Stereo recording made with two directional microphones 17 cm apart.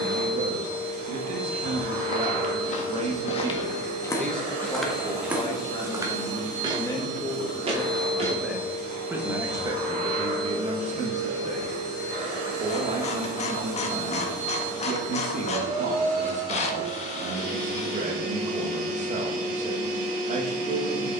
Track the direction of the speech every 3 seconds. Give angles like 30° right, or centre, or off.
50° right, 10° left, 10° left, 30° right, 50° right, 50° right, 50° right.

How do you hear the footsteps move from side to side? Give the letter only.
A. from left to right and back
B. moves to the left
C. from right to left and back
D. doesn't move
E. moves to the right
E.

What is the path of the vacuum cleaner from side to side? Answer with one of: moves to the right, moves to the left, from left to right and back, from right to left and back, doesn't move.
doesn't move.